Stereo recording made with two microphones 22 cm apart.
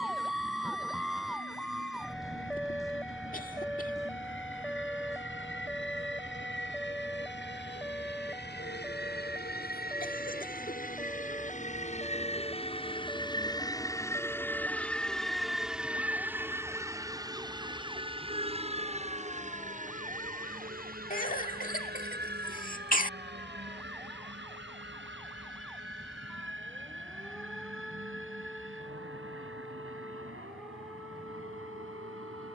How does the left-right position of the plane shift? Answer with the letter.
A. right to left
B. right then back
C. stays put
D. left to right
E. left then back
D.